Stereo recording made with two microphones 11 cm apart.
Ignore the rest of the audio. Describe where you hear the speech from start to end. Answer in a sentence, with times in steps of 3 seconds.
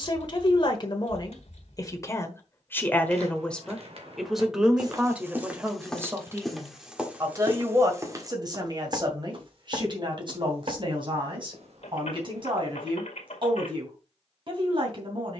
In this clip you hear the speech on the left from 0 s, in the centre from 3 s and on the right from 6 s.